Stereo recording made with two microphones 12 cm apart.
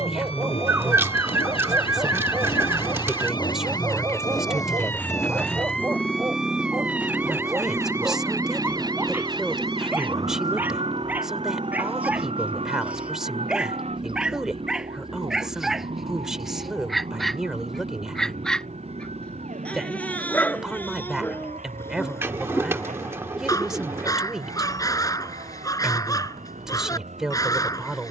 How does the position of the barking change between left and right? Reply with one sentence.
You can hear the barking travel towards the left.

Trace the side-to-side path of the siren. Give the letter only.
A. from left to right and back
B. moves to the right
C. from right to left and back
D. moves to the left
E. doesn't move
B.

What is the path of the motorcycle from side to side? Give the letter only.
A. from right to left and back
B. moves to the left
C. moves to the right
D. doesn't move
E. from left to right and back
C.